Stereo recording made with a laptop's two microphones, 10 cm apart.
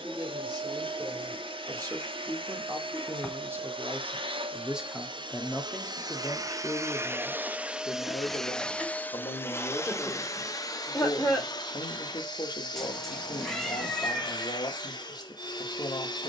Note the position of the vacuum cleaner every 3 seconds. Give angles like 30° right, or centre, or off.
60° right, 60° right, 10° right, 40° left, 50° left, 50° left.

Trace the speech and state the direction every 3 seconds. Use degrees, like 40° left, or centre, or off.
40° right, 10° right, 30° left, 50° left, 50° left, 50° left.